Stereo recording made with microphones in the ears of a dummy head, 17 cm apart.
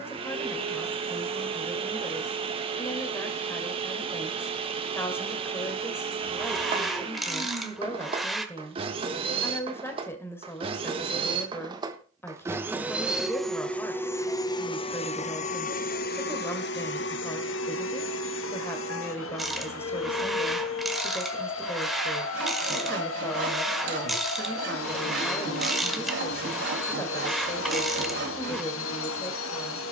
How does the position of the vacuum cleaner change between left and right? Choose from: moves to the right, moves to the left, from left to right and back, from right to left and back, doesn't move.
moves to the left.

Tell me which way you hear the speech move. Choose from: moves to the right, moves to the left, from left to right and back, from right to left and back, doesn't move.
doesn't move.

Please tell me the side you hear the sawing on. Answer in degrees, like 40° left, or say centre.
70° right.